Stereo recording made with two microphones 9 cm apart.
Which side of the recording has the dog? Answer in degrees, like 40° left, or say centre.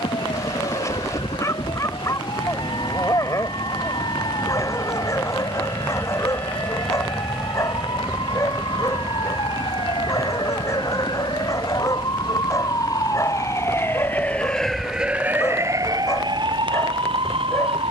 30° left.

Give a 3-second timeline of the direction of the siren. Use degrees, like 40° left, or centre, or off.
70° left, 70° left, 60° left, 60° left, 30° left, 50° right.